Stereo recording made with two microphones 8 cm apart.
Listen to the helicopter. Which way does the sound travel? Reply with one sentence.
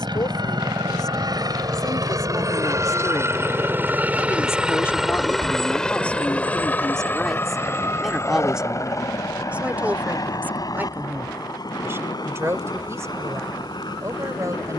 In this clip you hear the helicopter go from the right side to the left.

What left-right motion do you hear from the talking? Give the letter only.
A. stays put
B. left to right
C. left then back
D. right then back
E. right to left
B.